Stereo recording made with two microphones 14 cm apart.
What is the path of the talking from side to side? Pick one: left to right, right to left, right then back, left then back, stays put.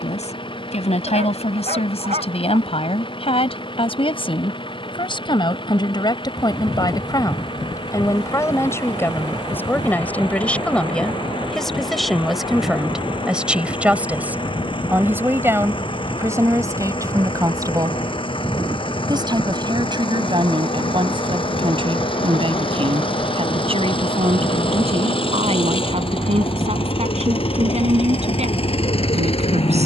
left to right.